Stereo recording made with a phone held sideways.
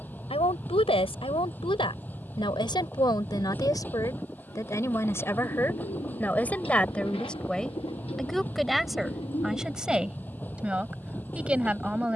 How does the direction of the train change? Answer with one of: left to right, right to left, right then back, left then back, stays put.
stays put.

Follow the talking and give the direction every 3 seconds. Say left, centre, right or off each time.
left, left, centre, centre.